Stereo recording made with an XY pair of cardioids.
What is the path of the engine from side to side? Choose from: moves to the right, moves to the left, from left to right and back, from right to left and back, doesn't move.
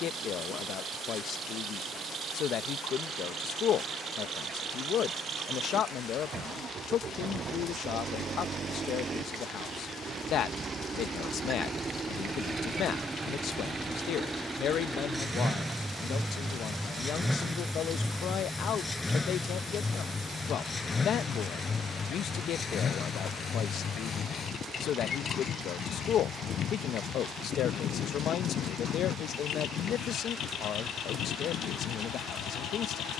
moves to the left.